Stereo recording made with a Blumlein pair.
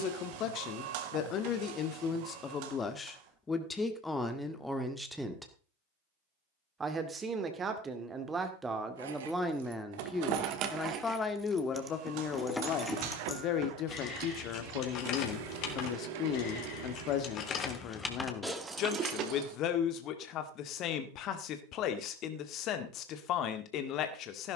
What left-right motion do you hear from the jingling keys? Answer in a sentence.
In this clip you hear the jingling keys move from right to left and back again.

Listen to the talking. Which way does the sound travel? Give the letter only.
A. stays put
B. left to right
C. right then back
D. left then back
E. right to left
C.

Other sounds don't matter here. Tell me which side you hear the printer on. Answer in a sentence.
In this clip you hear the printer on the right.